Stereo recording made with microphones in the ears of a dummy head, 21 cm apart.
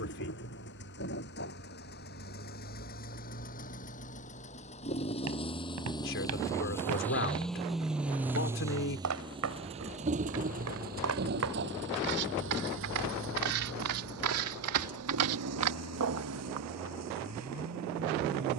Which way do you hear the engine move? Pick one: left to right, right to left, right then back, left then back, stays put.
left to right.